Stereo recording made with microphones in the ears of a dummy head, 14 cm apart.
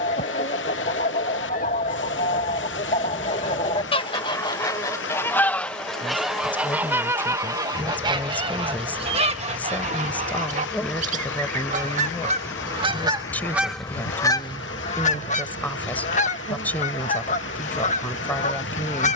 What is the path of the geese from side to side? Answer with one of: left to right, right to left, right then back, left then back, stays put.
right then back.